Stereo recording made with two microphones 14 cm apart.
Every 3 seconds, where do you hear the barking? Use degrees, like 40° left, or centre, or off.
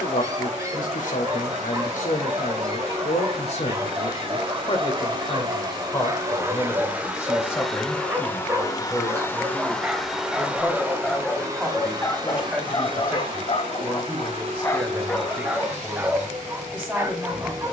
20° right, 20° right, 20° right, centre, 30° left, 10° right.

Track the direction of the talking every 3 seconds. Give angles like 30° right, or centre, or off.
60° left, 40° left, 20° left, centre, 10° right, 10° right.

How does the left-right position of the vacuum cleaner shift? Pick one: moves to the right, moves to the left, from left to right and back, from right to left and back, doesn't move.
from right to left and back.